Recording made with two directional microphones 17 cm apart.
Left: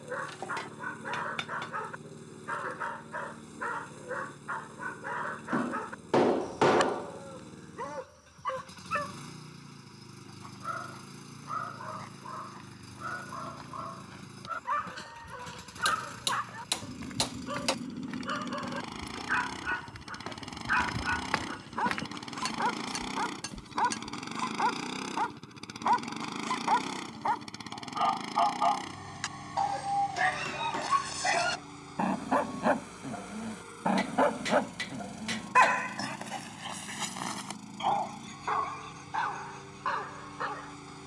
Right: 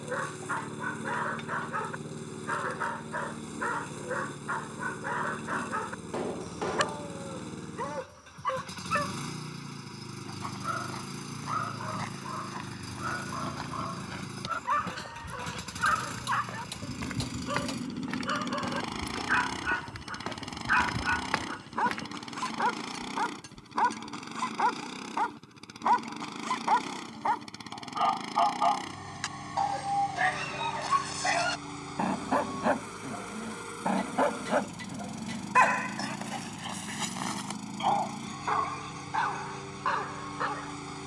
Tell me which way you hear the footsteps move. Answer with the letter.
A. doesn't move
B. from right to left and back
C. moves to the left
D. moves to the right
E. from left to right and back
C.